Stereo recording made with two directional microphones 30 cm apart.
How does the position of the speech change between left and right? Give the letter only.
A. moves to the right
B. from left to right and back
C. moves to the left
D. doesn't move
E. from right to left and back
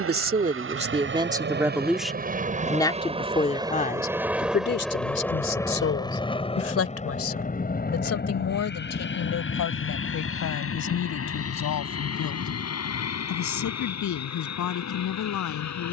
C.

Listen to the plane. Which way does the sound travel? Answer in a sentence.
In this clip you hear the plane travel towards the left.